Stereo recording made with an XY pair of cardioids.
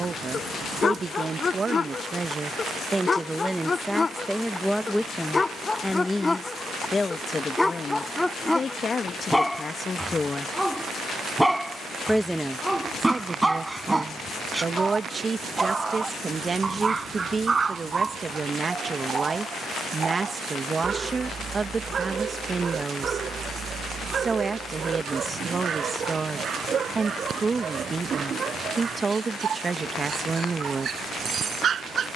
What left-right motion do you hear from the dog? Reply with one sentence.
In this clip you hear the dog travel towards the right.